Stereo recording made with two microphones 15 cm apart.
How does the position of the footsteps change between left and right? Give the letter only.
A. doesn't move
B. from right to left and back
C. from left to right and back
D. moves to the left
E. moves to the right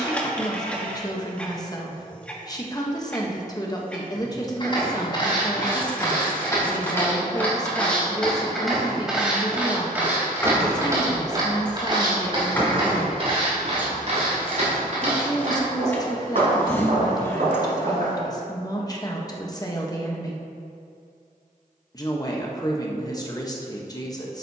E.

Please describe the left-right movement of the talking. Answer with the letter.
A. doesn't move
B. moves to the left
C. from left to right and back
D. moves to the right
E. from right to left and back
A.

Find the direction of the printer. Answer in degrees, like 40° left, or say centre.
10° left.